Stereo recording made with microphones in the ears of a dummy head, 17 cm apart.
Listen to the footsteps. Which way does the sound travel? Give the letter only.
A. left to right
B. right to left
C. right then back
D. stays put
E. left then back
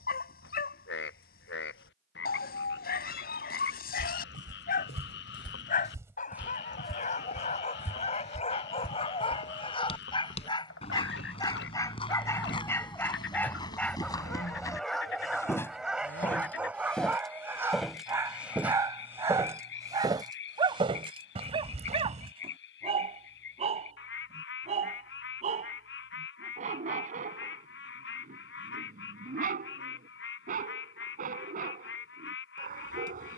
E.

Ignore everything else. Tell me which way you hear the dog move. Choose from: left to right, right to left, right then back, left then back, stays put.
left to right.